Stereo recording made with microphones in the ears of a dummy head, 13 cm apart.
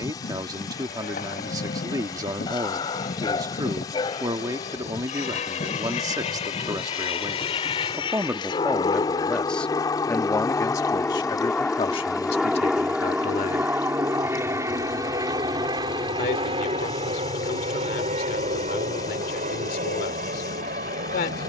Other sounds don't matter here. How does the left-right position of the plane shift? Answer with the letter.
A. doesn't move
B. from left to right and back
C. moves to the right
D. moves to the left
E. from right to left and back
C.